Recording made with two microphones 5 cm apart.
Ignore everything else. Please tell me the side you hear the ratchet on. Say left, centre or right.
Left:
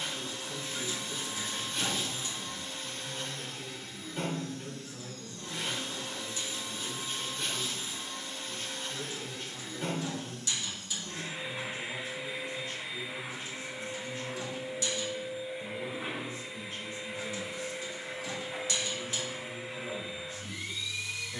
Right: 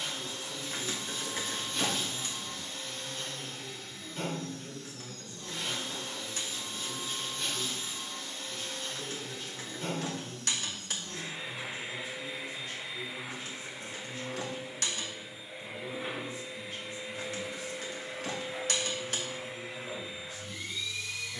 right.